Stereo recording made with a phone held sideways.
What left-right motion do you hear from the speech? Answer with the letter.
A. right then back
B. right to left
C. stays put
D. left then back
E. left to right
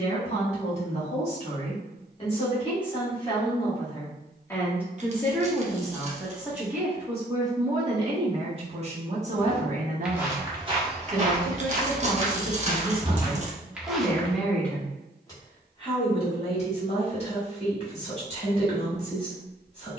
A.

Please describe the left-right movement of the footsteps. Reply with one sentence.
You can hear the footsteps go right and come back.